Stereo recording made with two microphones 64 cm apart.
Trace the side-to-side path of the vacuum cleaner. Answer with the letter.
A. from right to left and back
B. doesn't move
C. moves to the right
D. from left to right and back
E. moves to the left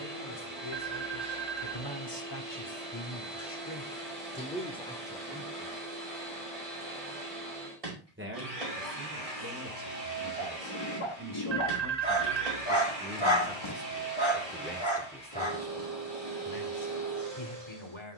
B.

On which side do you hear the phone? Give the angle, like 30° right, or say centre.
80° right.